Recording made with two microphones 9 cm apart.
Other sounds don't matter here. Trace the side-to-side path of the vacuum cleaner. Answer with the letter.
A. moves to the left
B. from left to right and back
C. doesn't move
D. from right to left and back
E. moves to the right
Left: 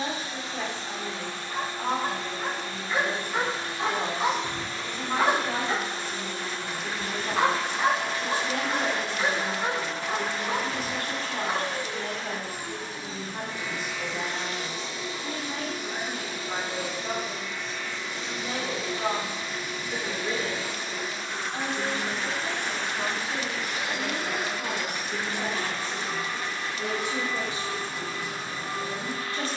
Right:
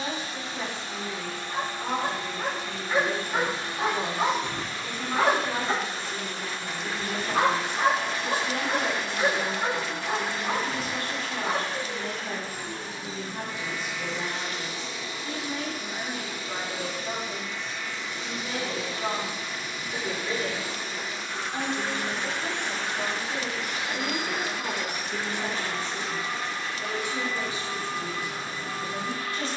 C.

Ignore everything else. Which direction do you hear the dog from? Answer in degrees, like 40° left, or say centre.
60° right.